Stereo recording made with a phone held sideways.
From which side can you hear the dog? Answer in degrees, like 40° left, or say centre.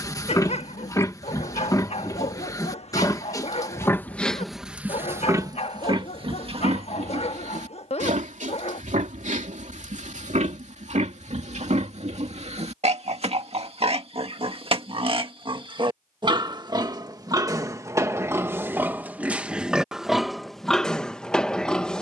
40° left.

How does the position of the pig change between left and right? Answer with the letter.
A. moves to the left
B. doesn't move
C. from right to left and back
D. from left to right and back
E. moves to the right
D.